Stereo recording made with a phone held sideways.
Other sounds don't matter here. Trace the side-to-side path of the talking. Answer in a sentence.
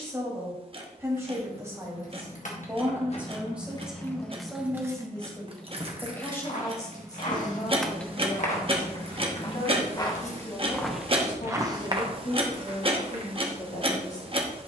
In this clip you hear the talking move to the left.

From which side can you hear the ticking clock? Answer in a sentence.
In this clip you hear the ticking clock on the right.